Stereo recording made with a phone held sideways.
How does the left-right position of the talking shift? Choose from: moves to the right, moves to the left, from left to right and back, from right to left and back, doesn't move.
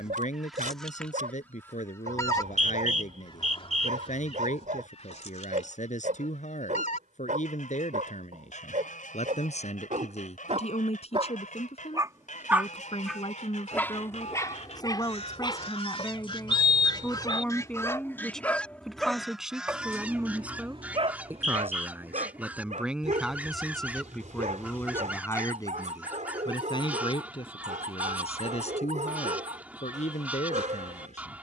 from left to right and back.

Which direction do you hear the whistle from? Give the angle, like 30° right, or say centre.
60° right.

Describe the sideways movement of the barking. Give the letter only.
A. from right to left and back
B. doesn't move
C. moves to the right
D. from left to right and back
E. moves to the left
A.